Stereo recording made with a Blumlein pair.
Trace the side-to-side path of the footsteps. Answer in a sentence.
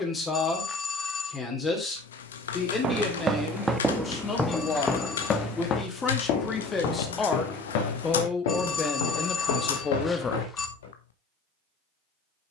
You can hear the footsteps go from the right side to the left.